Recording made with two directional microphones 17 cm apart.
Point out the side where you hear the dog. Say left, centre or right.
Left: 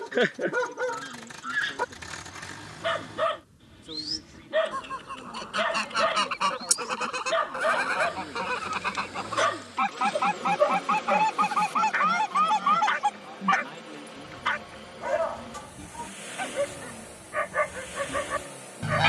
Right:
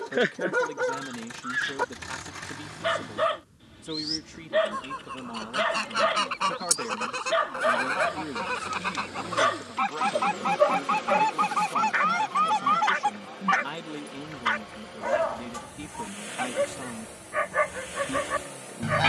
centre.